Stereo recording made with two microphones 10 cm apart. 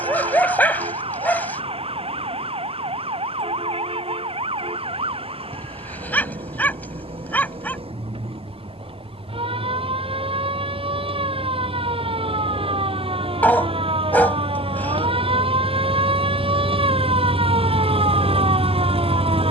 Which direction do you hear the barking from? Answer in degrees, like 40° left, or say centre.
20° left.